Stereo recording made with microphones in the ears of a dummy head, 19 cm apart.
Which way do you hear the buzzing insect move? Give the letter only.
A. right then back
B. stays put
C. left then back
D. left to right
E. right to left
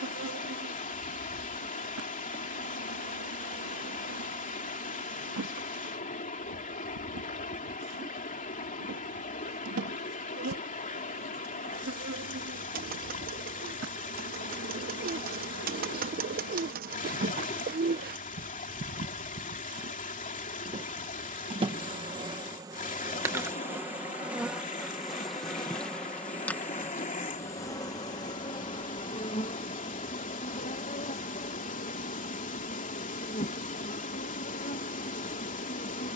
E.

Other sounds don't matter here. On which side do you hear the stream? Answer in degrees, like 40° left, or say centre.
40° left.